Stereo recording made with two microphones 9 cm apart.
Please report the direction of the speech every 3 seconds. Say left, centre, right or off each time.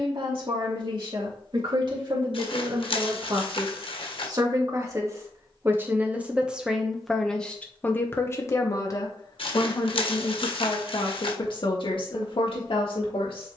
right, right, centre, left, left.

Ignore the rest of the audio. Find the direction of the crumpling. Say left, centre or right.
left.